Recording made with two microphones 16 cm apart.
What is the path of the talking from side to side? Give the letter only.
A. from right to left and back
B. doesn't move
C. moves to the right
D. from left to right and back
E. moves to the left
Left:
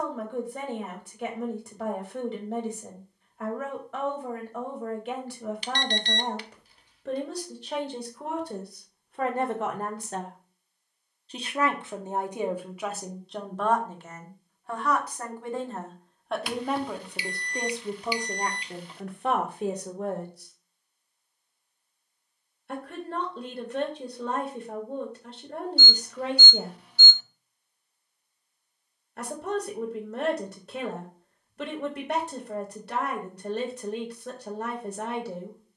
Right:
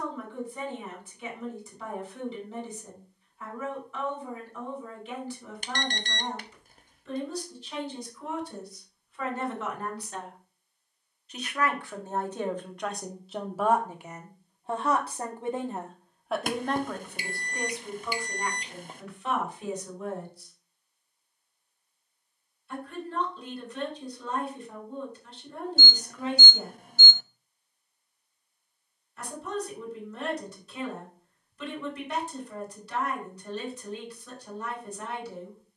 D.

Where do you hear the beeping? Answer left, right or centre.
right.